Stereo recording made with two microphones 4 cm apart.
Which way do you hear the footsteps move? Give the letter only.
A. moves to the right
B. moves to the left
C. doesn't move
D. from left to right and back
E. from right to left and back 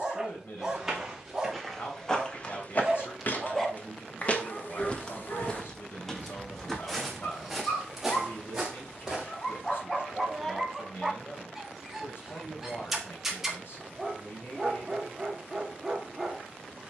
E.